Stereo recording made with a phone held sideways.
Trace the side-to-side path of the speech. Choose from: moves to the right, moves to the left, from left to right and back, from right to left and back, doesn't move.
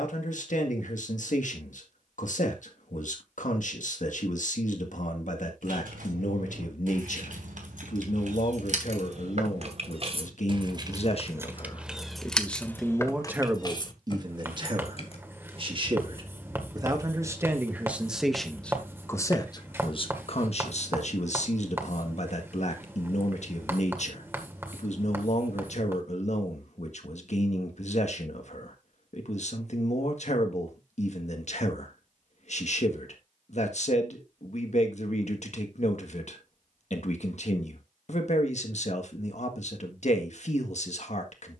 from left to right and back.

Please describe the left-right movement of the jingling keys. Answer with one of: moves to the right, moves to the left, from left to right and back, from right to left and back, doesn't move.
moves to the left.